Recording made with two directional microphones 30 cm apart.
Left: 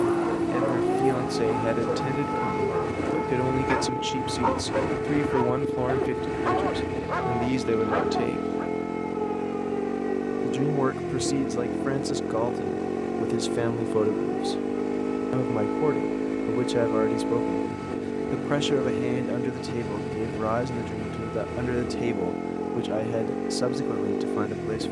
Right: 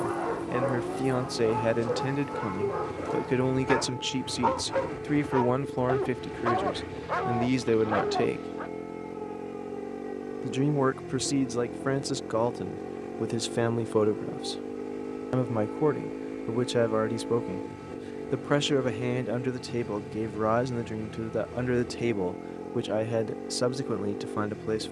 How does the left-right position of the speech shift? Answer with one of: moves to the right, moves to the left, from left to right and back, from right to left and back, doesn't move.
doesn't move.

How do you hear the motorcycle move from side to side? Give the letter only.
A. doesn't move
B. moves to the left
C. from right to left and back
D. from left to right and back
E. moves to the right
A.